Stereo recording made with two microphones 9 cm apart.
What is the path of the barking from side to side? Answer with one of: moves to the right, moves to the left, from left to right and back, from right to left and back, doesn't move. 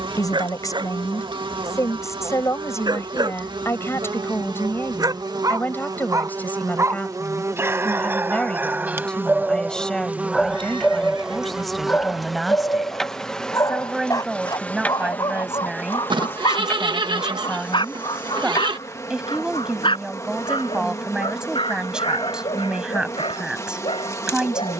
moves to the left.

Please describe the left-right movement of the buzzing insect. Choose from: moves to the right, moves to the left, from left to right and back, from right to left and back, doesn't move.
moves to the left.